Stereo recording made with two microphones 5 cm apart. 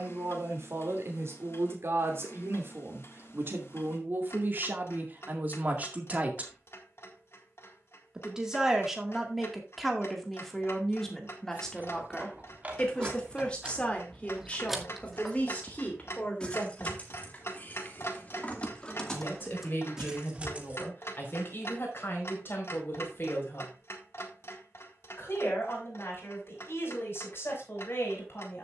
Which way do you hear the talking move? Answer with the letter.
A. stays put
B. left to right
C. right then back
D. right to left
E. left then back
D.